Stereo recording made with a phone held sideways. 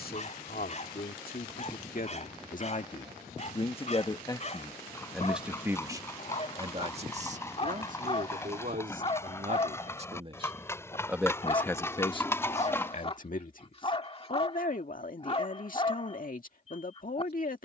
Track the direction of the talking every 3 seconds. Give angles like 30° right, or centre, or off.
60° left, 10° left, 50° right, 20° right, 50° left, 60° left.